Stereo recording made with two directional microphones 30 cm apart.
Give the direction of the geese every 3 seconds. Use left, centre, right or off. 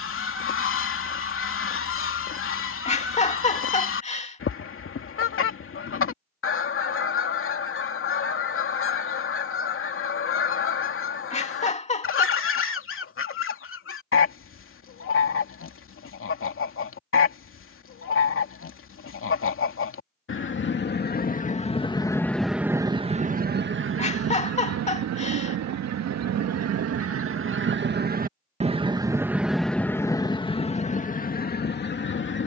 left, left, left, left, left, left, left, centre, right, right, left.